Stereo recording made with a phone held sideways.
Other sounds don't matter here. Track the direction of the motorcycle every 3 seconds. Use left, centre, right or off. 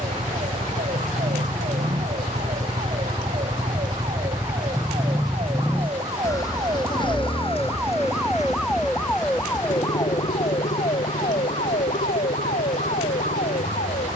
right, centre, left, left, left.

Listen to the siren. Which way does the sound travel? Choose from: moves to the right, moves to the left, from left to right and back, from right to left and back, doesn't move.
moves to the left.